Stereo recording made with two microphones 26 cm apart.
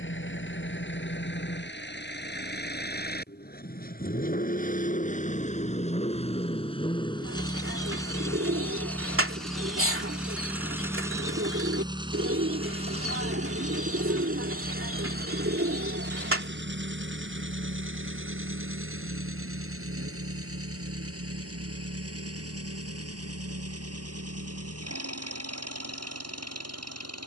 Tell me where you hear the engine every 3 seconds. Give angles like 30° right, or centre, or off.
40° left, 30° left, 20° left, 10° right, 30° right, 40° right, 60° right, 60° right, 70° right.